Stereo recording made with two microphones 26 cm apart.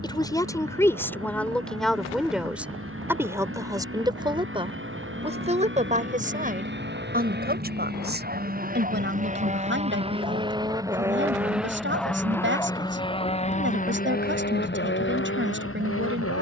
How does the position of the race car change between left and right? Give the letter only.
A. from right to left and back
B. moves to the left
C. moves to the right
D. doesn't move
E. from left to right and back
B.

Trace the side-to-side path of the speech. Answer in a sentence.
You can hear the speech move from left to right.